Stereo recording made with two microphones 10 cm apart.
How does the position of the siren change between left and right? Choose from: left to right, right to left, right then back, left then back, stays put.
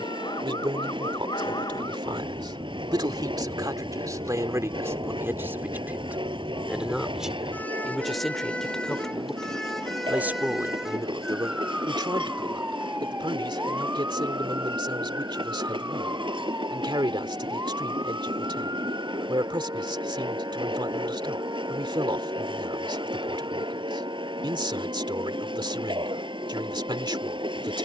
left to right.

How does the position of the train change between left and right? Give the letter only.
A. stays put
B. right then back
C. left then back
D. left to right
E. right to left
A.